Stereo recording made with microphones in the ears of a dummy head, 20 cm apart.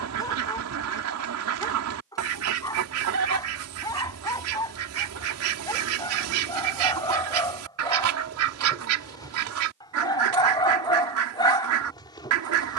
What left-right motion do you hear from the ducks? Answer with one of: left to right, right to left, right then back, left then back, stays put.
stays put.